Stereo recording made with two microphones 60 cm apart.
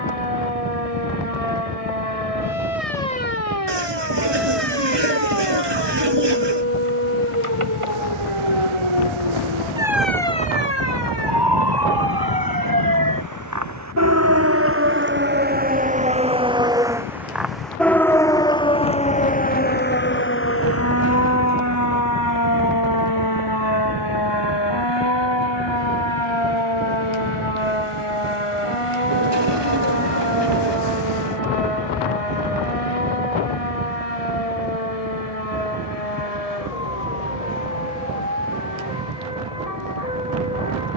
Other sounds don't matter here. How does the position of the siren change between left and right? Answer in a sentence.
In this clip you hear the siren travel towards the left.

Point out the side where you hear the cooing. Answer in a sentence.
You can hear the cooing on the right.